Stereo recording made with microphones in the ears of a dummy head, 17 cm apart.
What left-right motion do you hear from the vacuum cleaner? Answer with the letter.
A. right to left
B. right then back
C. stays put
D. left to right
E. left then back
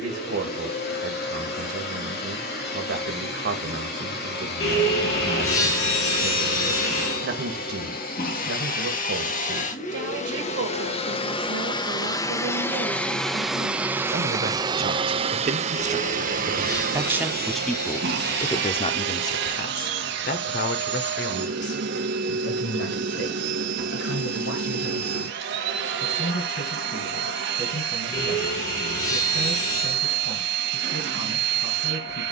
D.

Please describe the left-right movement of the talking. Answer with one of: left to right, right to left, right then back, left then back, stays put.
right to left.